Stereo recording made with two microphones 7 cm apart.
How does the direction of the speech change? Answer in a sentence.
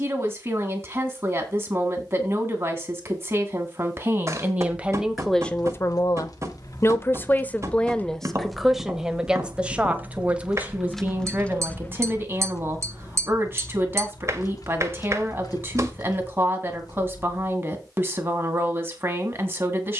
In this clip you hear the speech go left and come back.